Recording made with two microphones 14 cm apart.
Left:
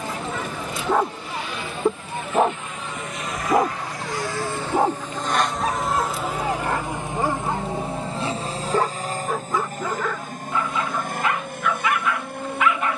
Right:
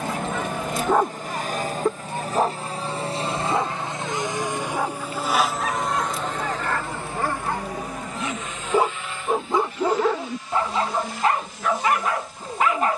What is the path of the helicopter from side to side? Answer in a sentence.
In this clip you hear the helicopter travel towards the left.